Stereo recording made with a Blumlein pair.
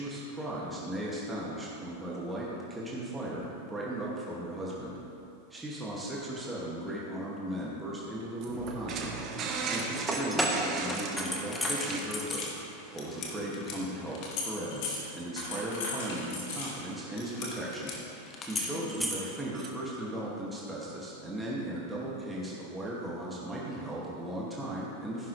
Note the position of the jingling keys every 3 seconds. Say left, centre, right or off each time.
off, off, right, centre, left, left, centre, off, off.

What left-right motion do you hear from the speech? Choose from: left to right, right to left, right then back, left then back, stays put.
stays put.